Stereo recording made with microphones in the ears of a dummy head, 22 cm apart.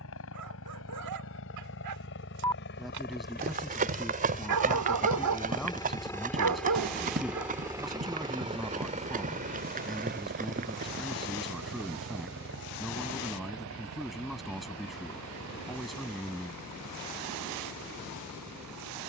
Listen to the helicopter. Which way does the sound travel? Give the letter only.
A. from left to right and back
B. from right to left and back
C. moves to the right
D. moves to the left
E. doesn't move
C.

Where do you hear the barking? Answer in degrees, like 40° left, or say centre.
80° right.